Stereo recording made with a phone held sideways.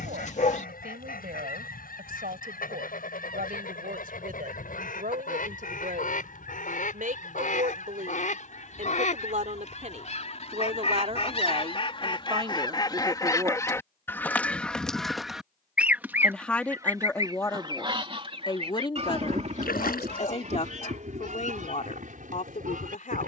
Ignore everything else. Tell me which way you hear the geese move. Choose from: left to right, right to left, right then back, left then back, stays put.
left to right.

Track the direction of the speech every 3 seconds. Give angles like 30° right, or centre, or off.
70° right, 70° right, 60° right, 50° right, 30° right, 10° left, 40° left, 50° left.